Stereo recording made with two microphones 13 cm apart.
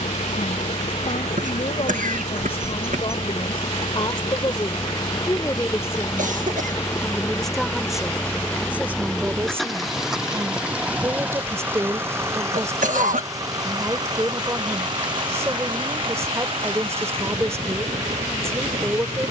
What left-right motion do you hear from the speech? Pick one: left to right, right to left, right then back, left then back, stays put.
left to right.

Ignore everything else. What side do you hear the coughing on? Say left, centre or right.
right.